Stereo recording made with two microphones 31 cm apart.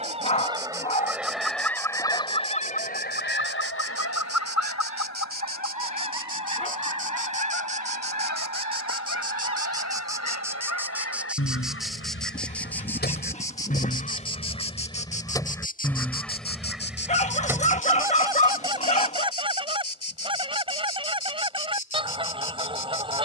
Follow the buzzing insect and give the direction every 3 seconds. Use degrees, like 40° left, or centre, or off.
30° right, 30° right, 20° right, 10° right, 10° left, 30° left, 50° left, 50° left.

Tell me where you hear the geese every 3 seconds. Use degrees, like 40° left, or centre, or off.
centre, 50° left, 60° left, 50° left, 30° left, centre, 10° right, 20° right.